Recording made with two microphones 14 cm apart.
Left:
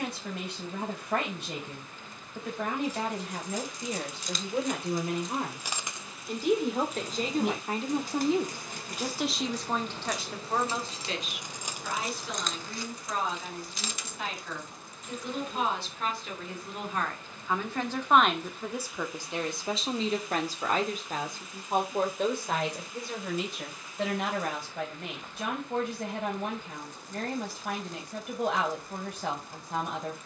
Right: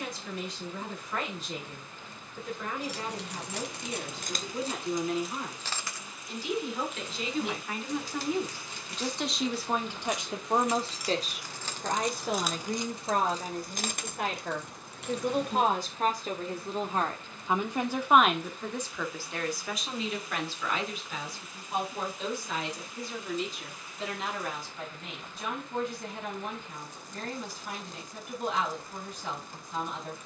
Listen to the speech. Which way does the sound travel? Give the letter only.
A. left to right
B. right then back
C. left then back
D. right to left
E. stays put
B.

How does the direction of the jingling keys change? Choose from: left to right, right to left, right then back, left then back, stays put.
left then back.